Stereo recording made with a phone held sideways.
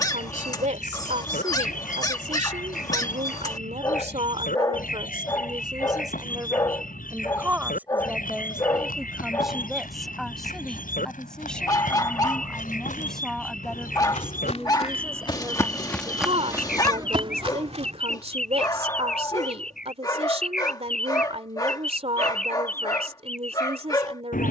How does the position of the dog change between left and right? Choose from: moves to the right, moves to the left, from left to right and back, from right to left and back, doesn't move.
doesn't move.